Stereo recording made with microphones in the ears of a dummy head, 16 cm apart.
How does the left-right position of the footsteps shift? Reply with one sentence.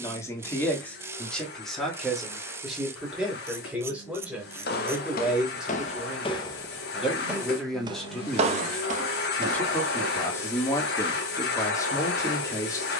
In this clip you hear the footsteps move to the right.